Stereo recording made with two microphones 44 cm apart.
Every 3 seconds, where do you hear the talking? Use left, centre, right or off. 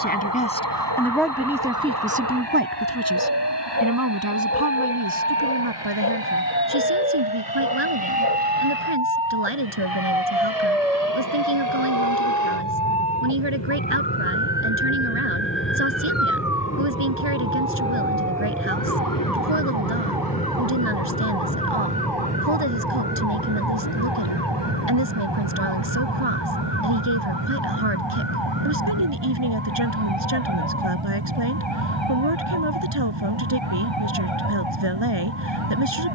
centre, right, right, right, right, right, right, right, right, right, right, right.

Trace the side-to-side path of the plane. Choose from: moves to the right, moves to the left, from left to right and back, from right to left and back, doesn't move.
moves to the right.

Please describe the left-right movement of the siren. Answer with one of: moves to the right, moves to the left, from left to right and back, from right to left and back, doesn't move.
moves to the left.